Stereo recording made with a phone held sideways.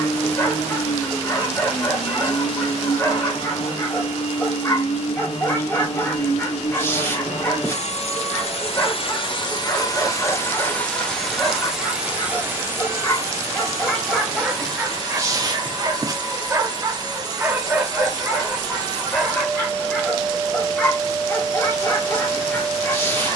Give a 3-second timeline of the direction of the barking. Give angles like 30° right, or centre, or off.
20° left, 20° left, 20° left, 20° left, 10° left, 20° right, centre, 20° left.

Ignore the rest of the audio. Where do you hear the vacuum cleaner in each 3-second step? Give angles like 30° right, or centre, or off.
60° left, 60° left, 60° left, 20° left, 20° right, 30° right, 30° right, 30° right.